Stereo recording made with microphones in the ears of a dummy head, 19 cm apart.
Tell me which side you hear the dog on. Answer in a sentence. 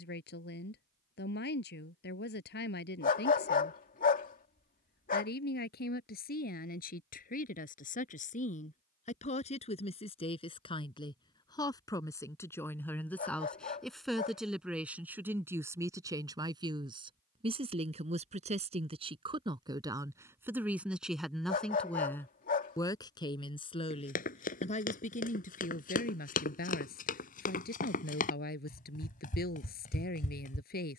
You can hear the dog on the left.